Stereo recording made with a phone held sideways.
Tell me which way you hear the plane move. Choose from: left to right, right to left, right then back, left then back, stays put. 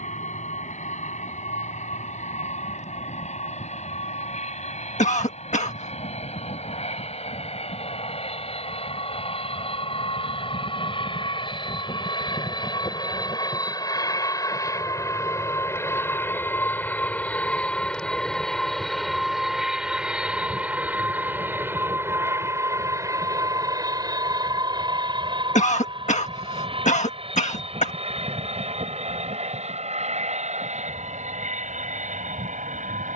left to right.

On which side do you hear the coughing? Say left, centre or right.
left.